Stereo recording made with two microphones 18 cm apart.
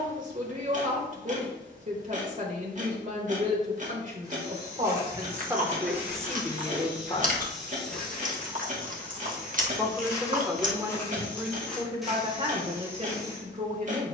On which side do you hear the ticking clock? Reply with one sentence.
In this clip you hear the ticking clock on the right.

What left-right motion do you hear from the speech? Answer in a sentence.
In this clip you hear the speech go left and come back.